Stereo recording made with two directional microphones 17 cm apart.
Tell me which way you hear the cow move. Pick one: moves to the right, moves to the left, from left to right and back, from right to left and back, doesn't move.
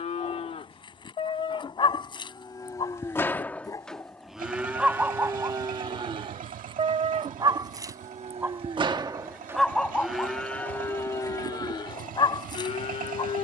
from left to right and back.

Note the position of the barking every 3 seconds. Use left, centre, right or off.
left, centre, right, centre, left.